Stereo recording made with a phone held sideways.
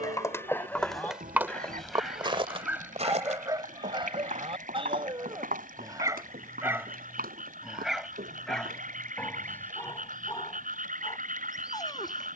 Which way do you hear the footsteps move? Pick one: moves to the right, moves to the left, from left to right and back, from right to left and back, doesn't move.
moves to the right.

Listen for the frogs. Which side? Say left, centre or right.
right.